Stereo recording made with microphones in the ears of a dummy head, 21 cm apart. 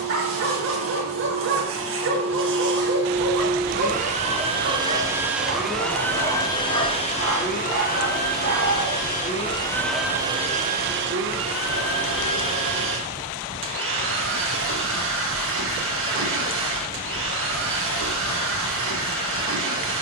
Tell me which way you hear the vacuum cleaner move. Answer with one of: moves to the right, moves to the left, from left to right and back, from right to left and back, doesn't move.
from right to left and back.